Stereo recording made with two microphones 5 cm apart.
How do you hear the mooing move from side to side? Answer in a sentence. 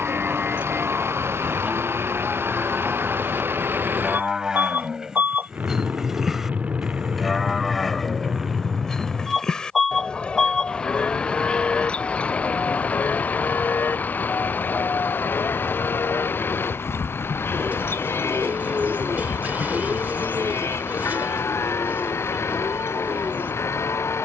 You can hear the mooing go from the right side to the left.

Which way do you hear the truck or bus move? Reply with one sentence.
You can hear the truck or bus move to the left.